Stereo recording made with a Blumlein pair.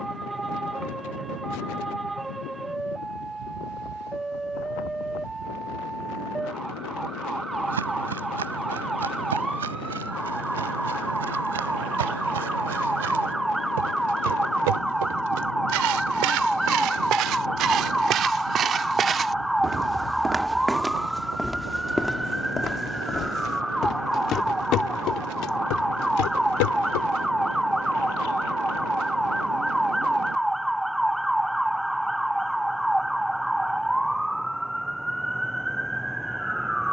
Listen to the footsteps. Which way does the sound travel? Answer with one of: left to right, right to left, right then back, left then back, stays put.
right to left.